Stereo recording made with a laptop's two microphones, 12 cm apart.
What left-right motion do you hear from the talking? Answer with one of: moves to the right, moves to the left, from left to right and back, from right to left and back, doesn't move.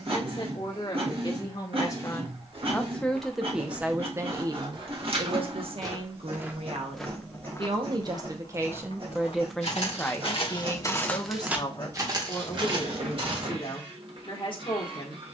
from left to right and back.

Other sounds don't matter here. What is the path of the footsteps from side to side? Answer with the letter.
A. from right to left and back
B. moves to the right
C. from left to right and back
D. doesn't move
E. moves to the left
A.